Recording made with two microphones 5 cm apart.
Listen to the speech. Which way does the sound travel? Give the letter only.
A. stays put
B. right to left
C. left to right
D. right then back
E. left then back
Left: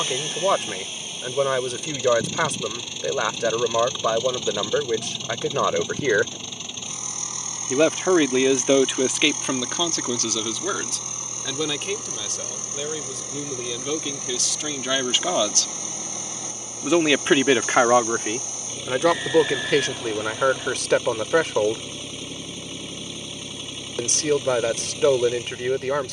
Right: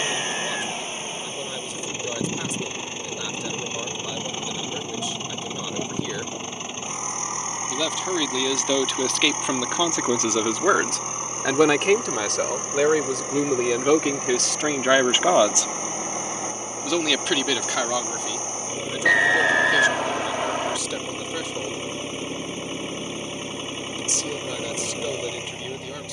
D.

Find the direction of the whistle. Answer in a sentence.
In this clip you hear the whistle on the right.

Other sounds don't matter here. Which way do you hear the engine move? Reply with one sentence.
You can hear the engine stay in one place.